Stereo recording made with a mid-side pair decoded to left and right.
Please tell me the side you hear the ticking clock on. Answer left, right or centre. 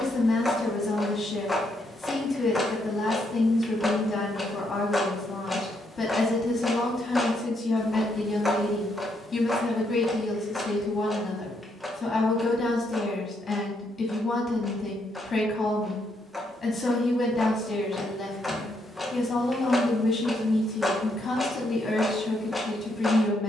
centre.